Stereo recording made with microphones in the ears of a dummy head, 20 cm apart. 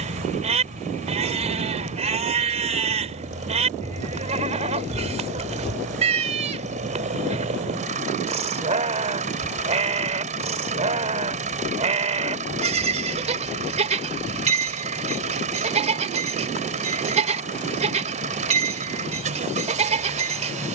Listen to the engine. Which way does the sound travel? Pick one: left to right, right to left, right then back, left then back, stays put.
stays put.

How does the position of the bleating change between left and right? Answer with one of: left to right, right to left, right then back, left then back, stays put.
stays put.